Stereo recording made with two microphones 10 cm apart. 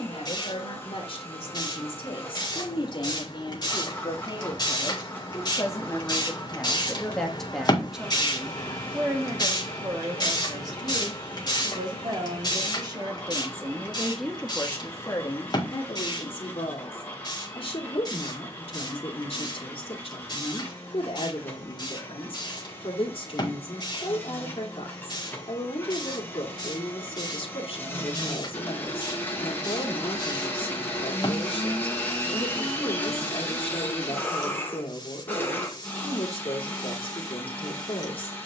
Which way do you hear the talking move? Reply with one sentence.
In this clip you hear the talking go right and come back.